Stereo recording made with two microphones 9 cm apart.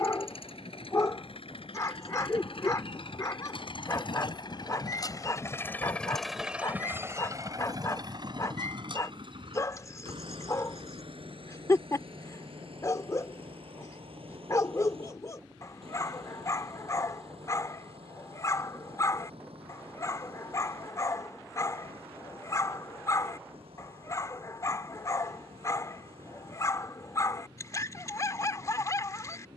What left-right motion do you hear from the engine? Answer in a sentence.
You can hear the engine move to the right.